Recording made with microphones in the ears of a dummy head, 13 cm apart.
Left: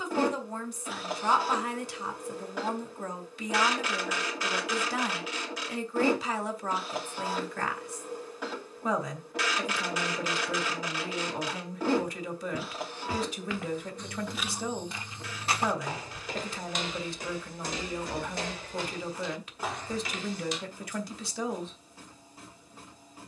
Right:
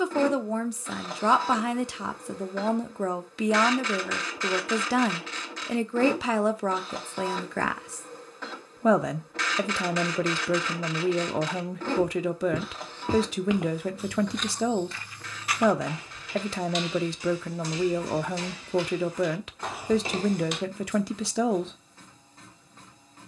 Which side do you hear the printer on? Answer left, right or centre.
centre.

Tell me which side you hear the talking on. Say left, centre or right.
right.